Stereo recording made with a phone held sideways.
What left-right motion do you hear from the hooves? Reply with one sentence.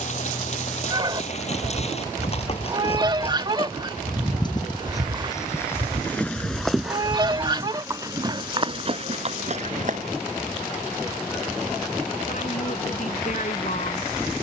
In this clip you hear the hooves go from the left side to the right.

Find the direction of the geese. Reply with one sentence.
You can hear the geese on the right.